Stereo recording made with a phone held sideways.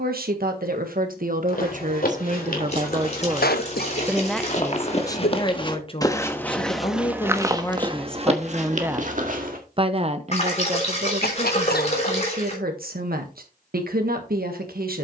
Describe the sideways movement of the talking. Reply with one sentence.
In this clip you hear the talking go left and come back.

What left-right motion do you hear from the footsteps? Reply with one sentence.
In this clip you hear the footsteps go from the left side to the right.